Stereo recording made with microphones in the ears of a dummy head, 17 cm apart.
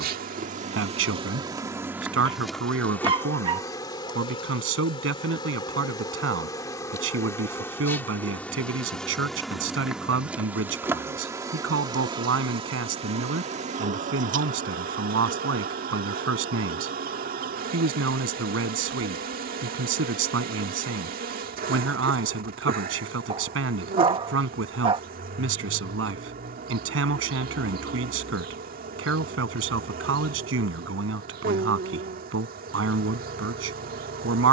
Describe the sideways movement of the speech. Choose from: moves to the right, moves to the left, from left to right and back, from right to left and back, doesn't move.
doesn't move.